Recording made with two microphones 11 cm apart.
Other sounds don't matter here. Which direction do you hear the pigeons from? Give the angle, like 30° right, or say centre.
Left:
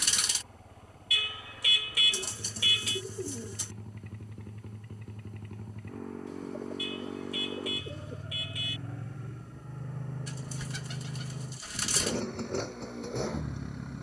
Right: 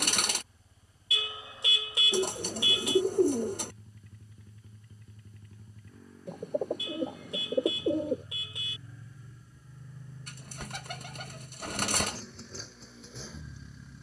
60° right.